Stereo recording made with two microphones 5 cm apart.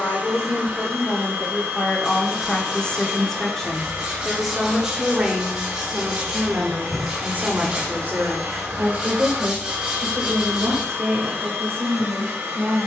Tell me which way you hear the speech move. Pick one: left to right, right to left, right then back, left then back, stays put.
left to right.